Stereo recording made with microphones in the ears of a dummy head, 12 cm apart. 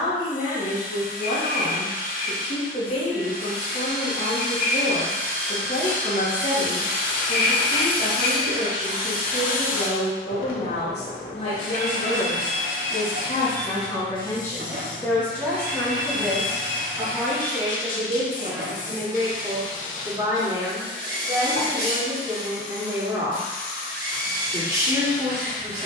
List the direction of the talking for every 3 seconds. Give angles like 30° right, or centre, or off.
50° left, 50° left, 50° left, 50° left, 30° left, centre, 20° right, 20° right, 20° right.